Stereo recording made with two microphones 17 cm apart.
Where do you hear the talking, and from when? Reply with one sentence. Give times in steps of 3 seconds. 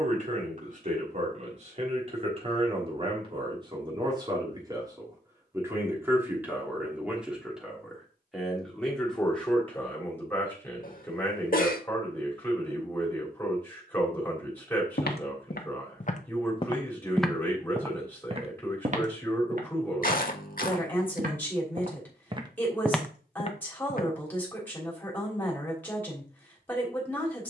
In this clip you hear the talking on the right from 0 s and in the centre from 6 s.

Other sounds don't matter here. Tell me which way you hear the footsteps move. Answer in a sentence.
You can hear the footsteps go right and come back.